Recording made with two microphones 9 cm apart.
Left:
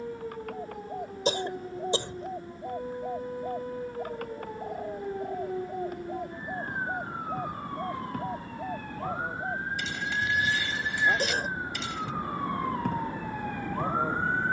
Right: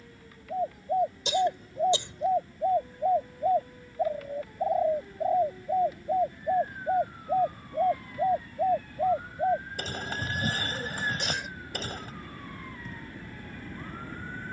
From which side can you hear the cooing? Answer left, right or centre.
right.